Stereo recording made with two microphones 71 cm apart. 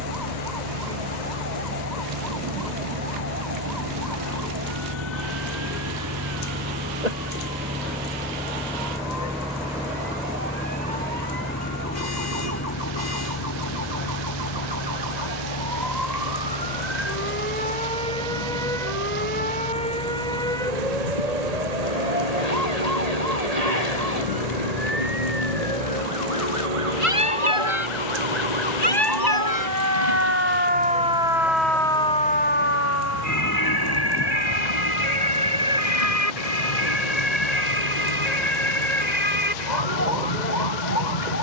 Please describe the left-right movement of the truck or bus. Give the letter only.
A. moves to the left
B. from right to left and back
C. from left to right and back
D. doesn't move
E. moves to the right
A.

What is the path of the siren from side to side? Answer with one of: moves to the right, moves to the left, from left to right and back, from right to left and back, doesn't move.
moves to the left.